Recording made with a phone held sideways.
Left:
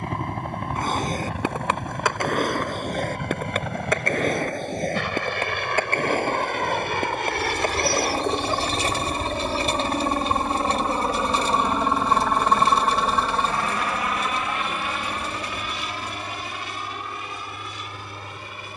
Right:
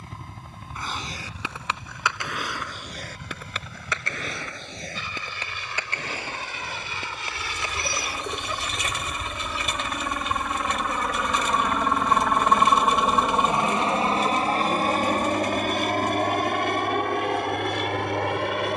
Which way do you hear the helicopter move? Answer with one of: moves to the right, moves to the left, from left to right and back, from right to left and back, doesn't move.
moves to the right.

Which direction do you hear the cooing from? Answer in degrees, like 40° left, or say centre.
30° left.